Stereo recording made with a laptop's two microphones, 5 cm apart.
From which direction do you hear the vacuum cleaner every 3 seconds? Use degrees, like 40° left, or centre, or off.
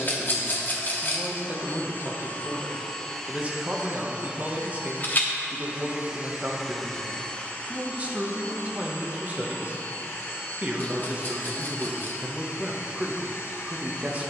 50° left, 20° right, 30° left, 60° left, 60° left.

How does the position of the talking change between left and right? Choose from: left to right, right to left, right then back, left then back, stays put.
stays put.